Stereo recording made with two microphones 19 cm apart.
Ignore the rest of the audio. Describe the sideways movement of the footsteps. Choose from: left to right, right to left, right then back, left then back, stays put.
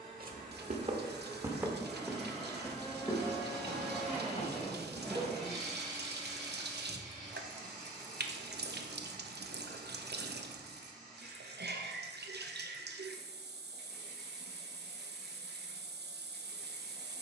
right to left.